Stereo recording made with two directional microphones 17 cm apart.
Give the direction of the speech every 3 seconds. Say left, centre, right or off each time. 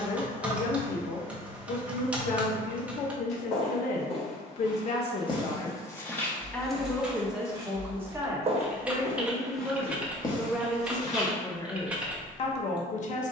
left, left, centre, centre, left.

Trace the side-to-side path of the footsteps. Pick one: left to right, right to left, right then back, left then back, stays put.
right then back.